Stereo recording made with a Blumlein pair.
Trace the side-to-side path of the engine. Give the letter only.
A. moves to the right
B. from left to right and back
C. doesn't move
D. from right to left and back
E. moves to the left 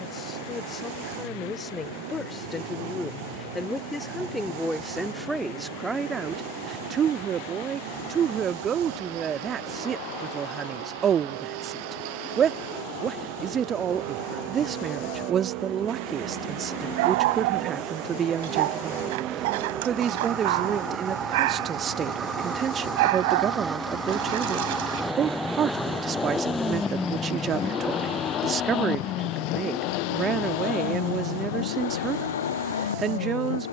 E.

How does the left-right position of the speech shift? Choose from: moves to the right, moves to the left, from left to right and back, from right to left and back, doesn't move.
moves to the right.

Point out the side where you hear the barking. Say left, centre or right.
right.